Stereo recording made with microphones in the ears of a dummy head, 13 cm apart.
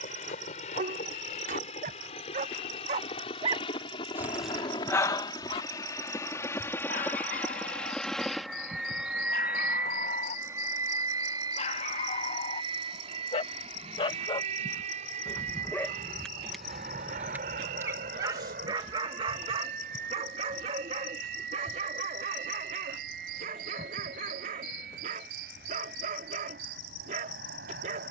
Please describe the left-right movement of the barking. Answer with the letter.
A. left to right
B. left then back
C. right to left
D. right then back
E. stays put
B.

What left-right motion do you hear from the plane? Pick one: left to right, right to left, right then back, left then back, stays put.
left to right.